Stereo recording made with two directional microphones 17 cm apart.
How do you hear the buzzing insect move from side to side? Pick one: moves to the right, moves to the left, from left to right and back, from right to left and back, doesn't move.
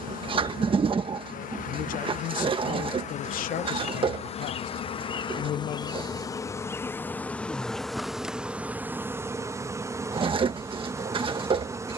moves to the right.